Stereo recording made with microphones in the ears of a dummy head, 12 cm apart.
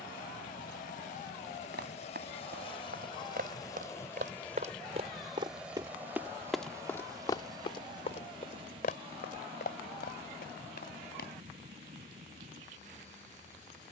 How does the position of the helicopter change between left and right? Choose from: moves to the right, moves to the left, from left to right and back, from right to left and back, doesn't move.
moves to the right.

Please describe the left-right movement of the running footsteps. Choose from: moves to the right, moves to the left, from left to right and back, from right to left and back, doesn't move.
moves to the left.